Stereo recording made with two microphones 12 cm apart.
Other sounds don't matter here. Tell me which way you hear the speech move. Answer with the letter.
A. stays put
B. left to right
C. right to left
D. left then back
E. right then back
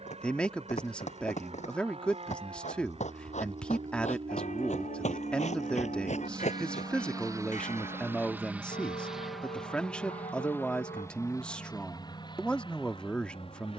A.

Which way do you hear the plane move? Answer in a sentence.
In this clip you hear the plane travel towards the left.